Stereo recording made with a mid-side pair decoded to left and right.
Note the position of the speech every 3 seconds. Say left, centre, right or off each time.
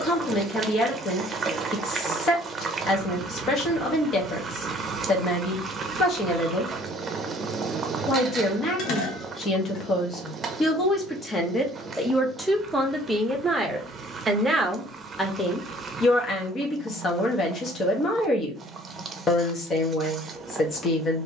left, left, left, left, centre, left, left.